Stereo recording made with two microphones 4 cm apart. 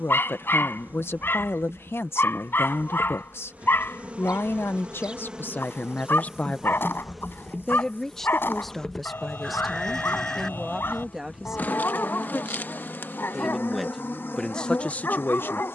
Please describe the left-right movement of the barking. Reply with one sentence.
You can hear the barking stay in one place.